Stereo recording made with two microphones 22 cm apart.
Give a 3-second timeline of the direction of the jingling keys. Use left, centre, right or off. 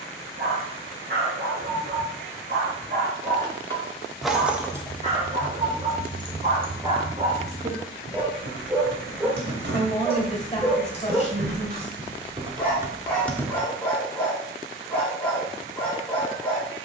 off, centre, right, right, centre, off.